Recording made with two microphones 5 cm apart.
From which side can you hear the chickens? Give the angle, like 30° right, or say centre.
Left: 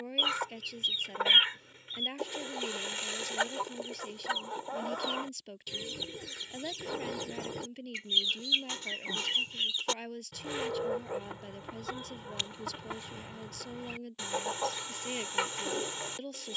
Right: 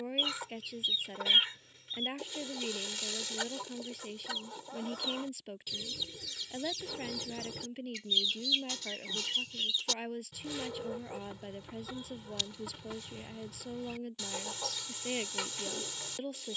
40° left.